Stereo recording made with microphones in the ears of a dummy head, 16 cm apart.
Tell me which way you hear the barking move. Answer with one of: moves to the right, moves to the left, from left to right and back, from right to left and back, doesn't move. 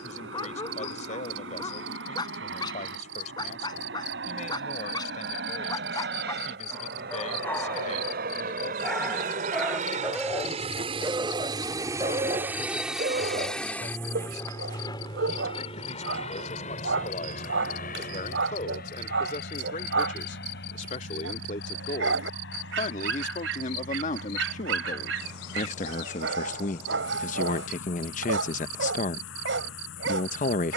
moves to the right.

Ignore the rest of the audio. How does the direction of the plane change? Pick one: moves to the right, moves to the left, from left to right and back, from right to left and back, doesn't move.
moves to the left.